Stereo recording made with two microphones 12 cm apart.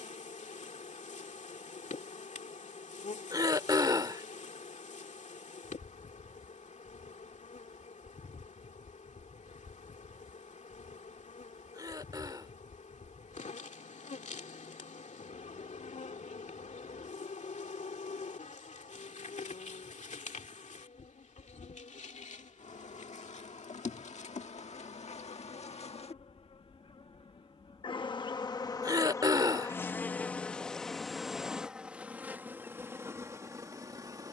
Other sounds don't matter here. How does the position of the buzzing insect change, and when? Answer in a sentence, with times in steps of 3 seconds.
In this clip you hear the buzzing insect on the left from 0 s, in the centre from 30 s and on the right from 33 s.